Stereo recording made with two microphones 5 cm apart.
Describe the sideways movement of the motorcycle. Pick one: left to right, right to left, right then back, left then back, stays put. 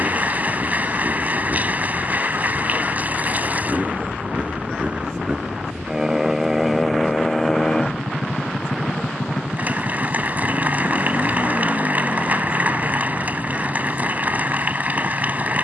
right to left.